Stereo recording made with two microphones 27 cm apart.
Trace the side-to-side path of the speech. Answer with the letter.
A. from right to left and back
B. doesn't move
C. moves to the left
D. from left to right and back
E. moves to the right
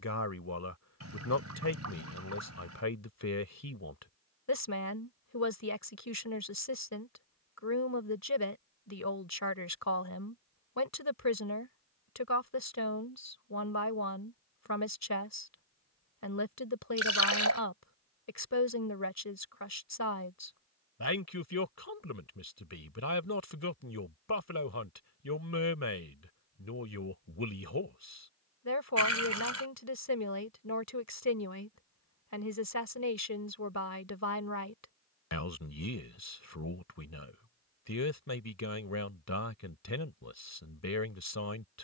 B.